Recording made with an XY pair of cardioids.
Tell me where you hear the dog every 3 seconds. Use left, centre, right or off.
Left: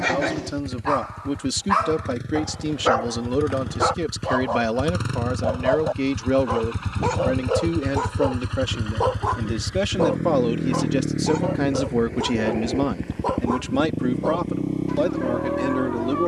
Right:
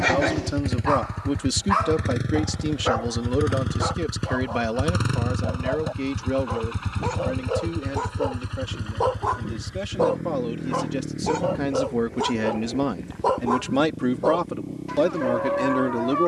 centre, left, left, centre, right, right.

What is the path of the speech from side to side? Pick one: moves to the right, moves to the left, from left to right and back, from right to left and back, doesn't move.
from right to left and back.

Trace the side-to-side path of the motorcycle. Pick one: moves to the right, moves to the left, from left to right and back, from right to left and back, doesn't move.
moves to the left.